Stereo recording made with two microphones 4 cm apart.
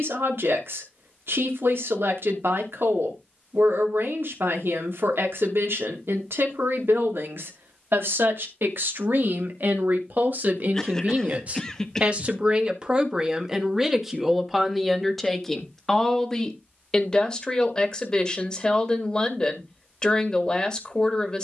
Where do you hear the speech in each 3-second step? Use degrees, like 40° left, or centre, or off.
70° right, 70° right, 70° right, 50° right, 10° right, 10° left, 20° left.